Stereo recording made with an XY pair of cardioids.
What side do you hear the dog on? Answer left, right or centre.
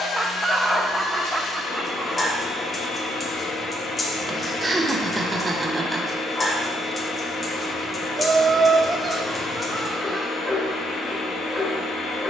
left.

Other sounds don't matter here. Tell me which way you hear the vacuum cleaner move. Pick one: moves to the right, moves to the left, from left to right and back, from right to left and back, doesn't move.
doesn't move.